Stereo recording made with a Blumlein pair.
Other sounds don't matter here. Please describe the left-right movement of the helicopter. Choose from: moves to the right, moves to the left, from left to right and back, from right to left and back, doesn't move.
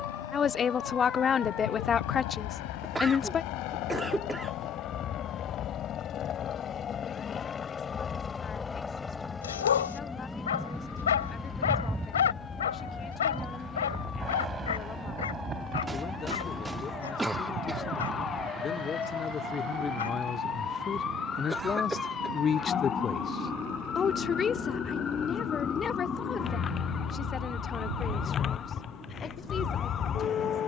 moves to the right.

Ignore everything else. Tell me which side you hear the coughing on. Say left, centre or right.
centre.